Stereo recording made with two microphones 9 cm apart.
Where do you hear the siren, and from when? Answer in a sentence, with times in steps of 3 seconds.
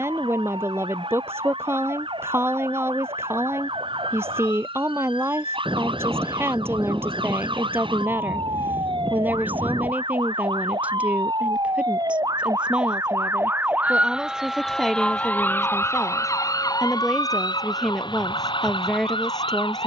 You can hear the siren on the right from 0 s and on the left from 15 s.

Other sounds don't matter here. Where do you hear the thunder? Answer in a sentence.
In this clip you hear the thunder on the right.